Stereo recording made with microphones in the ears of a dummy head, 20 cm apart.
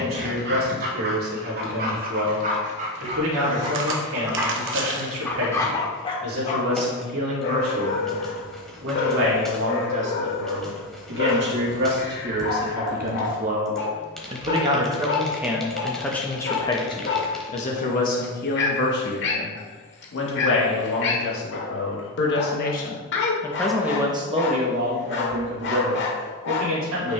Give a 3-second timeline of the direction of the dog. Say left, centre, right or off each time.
right, centre, left, left, left, left, left, left, left.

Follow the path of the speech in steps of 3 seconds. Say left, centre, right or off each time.
right, right, right, right, right, centre, left, left, right.